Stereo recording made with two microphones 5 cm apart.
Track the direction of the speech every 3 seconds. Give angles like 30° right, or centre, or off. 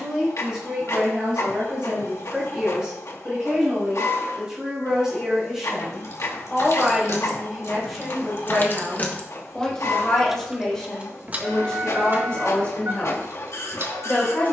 20° right, 10° right, centre, 10° left, 20° left.